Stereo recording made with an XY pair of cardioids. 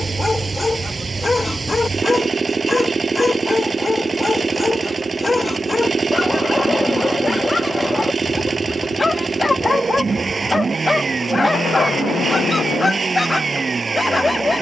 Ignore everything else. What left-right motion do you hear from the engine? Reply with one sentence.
You can hear the engine stay in one place.